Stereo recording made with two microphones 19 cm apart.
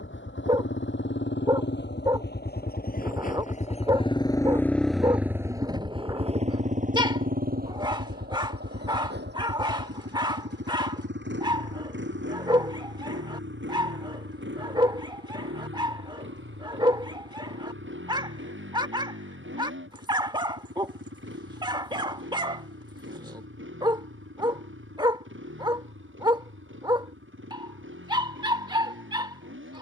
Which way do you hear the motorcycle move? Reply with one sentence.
In this clip you hear the motorcycle move from left to right.